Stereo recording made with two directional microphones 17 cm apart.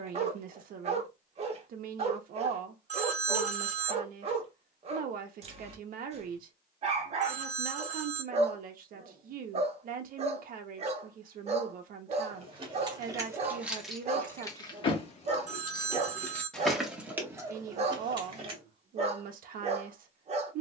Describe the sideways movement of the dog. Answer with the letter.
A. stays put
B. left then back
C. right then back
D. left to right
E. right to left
A.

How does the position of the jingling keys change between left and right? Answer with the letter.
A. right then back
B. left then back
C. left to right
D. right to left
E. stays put
B.